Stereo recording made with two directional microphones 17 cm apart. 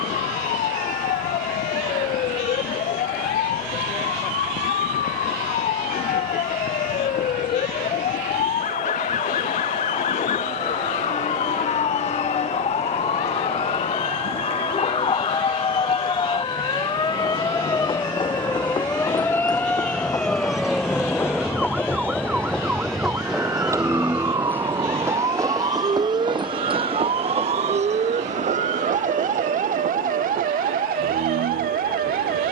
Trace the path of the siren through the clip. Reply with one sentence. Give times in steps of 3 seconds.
You can hear the siren on the left from 0 s, in the centre from 18 s and on the right from 24 s.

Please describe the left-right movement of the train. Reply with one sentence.
In this clip you hear the train go from the left side to the right.